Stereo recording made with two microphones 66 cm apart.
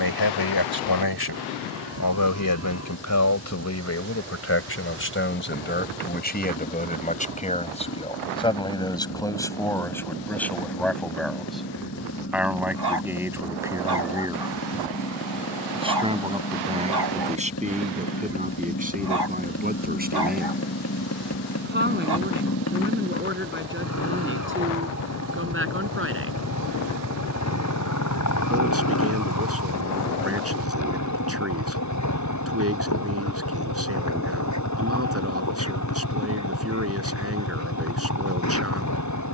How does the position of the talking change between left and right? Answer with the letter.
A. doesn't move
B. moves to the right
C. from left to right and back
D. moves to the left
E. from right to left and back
B.